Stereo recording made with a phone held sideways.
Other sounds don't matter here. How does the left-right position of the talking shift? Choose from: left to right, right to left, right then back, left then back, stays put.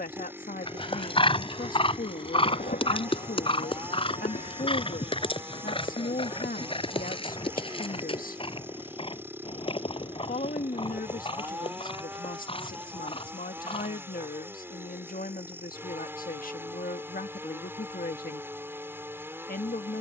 stays put.